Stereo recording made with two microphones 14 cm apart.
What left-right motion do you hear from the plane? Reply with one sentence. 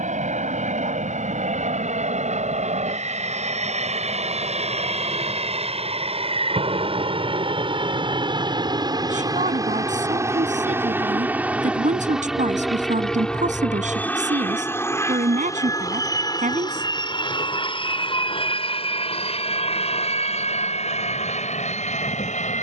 In this clip you hear the plane travel towards the left.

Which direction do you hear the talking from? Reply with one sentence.
In this clip you hear the talking on the right.